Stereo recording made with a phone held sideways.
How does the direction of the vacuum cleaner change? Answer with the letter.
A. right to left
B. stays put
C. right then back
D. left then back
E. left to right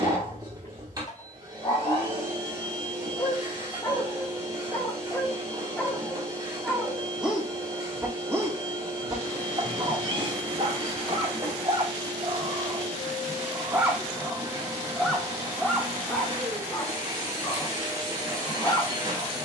B.